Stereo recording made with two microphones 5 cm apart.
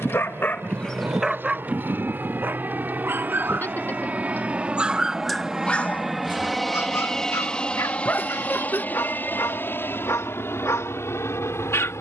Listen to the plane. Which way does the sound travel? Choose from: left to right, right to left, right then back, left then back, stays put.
right to left.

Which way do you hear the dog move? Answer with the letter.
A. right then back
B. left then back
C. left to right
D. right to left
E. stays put
A.